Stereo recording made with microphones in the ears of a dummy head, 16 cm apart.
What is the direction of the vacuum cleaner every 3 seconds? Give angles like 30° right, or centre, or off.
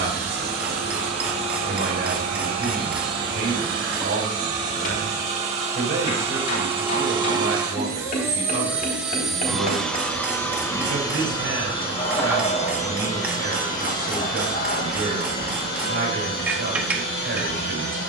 50° right, 40° right, 20° right, 10° left, 40° left, 60° left.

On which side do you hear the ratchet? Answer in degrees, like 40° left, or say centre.
10° right.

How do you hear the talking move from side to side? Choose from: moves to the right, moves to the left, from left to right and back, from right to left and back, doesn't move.
doesn't move.